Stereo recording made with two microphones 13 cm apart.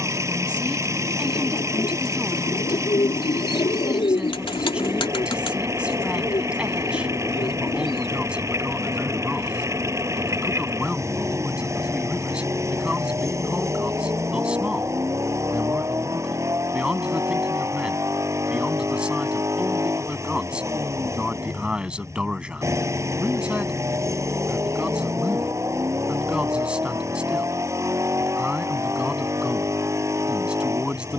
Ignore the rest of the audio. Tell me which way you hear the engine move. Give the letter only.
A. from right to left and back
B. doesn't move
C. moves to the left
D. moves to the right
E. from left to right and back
B.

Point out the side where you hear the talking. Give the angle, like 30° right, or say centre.
10° right.